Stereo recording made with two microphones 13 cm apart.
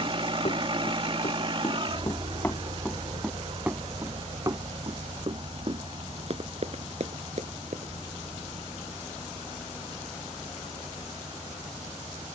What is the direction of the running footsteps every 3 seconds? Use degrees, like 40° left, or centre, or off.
30° left, 30° right, 50° right, off.